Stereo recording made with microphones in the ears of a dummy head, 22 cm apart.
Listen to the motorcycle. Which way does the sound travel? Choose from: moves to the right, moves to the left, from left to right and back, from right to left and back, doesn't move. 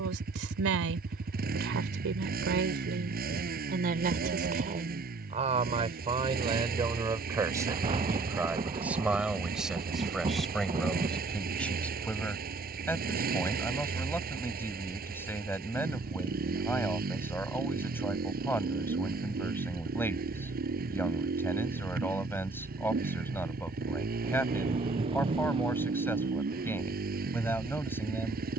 doesn't move.